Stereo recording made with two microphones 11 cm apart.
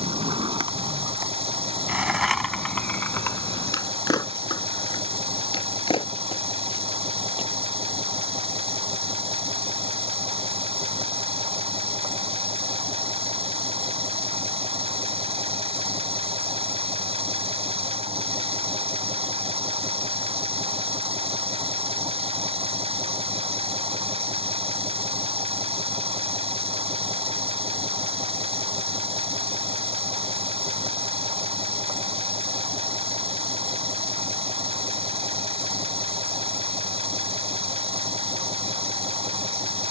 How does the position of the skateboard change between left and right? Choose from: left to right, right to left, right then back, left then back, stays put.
right to left.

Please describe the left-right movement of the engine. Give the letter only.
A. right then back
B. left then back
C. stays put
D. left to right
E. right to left
C.